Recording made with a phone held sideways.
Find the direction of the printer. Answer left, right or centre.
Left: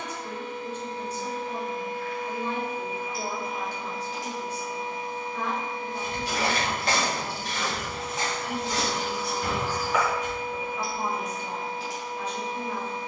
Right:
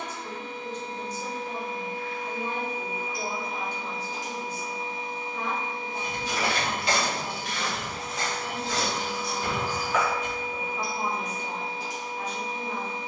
right.